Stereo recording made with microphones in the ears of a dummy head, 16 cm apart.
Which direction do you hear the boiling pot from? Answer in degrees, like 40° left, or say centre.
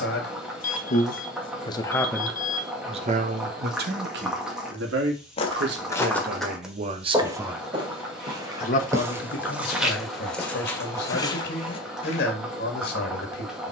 centre.